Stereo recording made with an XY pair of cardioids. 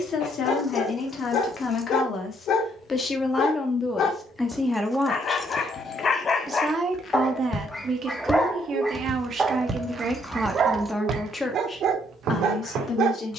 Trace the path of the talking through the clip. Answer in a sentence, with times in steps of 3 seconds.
You can hear the talking on the left from 0 s, in the centre from 3 s, on the right from 6 s, in the centre from 9 s and on the left from 12 s.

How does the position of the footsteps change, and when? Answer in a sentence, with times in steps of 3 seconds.
In this clip you hear the footsteps not at all from 0 s, on the left from 6 s and on the right from 9 s.